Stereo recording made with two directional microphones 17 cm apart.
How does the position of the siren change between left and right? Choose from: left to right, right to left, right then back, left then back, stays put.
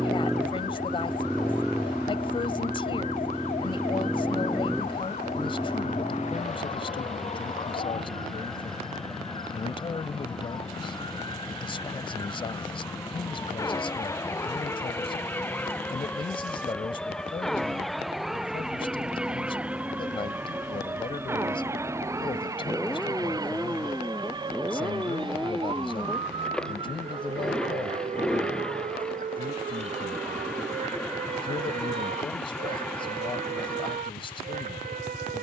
left to right.